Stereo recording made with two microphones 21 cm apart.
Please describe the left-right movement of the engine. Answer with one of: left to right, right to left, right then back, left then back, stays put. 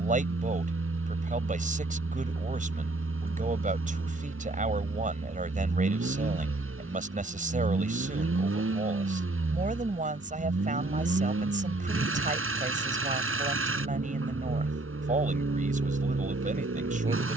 stays put.